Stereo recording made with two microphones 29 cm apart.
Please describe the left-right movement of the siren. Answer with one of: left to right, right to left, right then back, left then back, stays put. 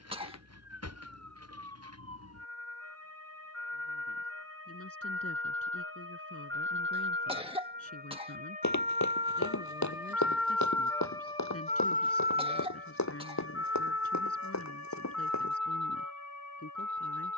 right to left.